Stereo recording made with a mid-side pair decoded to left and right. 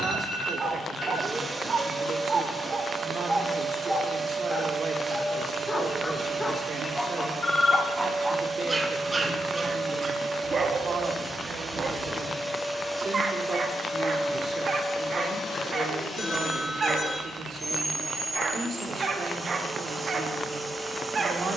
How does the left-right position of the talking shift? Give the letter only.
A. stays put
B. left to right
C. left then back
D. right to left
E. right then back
A.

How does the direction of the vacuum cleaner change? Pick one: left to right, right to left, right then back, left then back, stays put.
left then back.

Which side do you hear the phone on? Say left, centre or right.
left.